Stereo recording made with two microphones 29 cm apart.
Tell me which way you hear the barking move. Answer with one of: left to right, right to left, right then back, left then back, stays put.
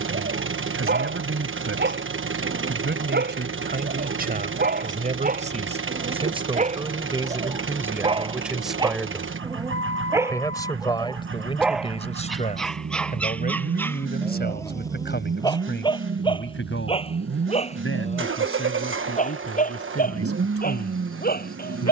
right to left.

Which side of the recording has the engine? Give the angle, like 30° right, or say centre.
40° right.